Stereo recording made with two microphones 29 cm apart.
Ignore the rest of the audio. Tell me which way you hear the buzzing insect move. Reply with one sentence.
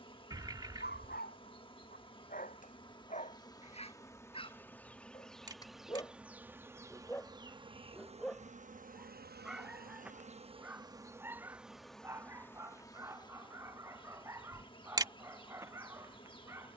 In this clip you hear the buzzing insect go right and come back.